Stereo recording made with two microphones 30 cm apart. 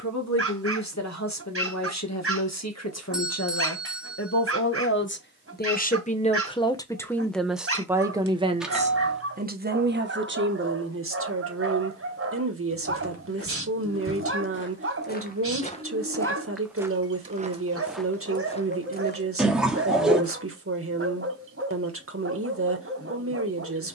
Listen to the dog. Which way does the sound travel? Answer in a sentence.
In this clip you hear the dog stay in one place.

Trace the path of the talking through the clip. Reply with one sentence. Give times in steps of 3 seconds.
In this clip you hear the talking on the left from 0 s, in the centre from 6 s and on the right from 9 s.